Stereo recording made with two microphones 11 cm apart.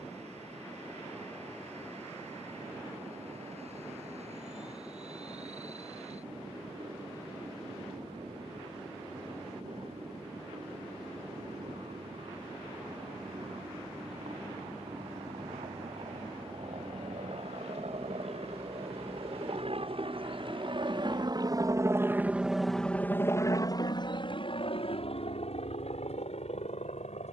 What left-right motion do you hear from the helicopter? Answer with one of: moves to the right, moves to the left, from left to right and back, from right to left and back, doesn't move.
moves to the left.